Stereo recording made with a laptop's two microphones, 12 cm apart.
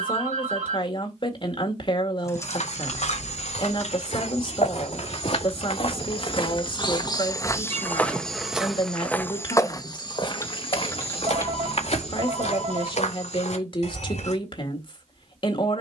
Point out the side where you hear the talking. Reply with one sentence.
You can hear the talking on the left.